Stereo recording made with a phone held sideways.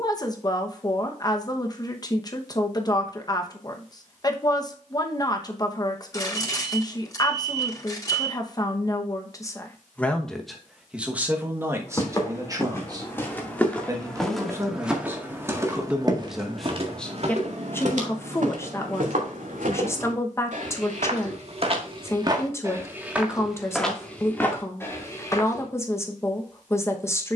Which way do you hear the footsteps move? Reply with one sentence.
You can hear the footsteps go right and come back.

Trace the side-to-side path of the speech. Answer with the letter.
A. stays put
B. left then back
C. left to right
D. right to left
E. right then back
E.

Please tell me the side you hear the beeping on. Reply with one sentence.
In this clip you hear the beeping on the left.